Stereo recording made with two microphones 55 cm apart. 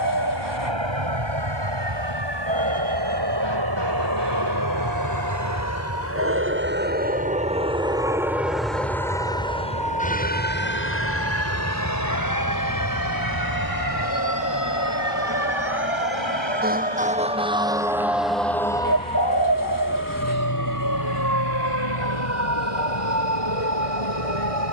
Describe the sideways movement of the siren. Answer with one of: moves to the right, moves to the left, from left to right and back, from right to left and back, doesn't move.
moves to the left.